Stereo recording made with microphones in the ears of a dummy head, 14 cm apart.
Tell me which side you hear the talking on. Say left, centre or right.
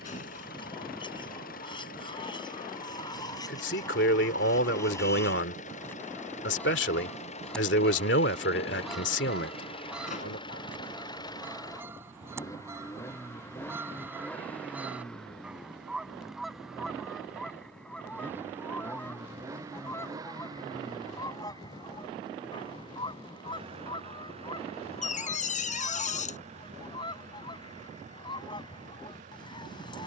left.